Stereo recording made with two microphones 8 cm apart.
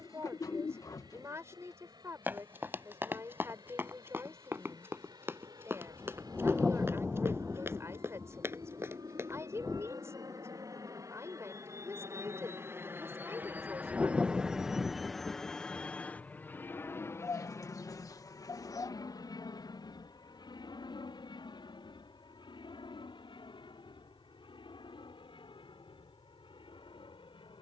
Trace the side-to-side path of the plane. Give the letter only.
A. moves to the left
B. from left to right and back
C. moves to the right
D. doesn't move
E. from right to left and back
A.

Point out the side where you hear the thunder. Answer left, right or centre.
centre.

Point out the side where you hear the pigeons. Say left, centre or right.
left.